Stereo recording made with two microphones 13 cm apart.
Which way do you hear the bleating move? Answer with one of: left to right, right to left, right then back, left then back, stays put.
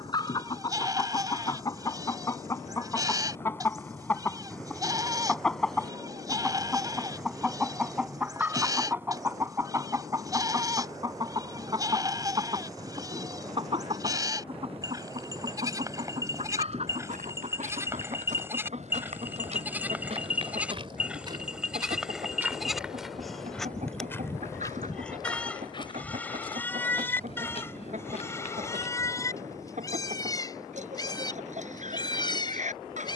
right to left.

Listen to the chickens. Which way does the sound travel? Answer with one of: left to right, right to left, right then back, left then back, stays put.
left to right.